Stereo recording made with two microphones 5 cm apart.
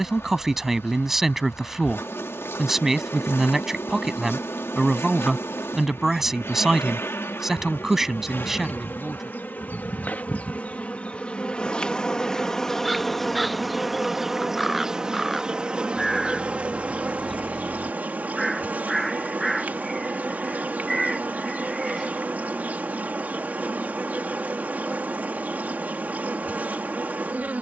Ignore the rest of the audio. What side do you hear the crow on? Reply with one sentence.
In this clip you hear the crow in the centre.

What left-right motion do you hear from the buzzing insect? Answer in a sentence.
In this clip you hear the buzzing insect go from the left side to the right.